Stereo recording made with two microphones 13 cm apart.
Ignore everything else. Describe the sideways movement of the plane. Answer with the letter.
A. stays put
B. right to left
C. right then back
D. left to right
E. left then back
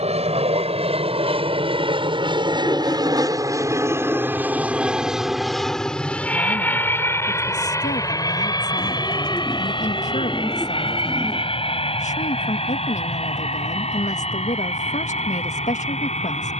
B.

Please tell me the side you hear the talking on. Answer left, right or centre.
left.